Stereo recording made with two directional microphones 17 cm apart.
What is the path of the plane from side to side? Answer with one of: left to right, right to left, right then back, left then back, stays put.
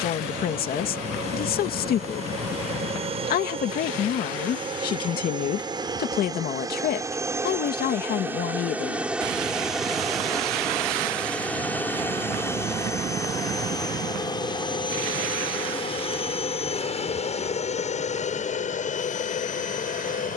right to left.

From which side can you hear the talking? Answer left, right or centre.
left.